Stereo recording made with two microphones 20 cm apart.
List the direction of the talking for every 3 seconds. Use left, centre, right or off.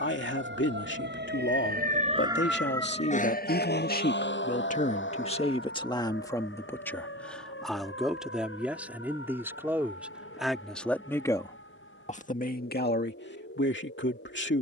left, left, centre, centre, left.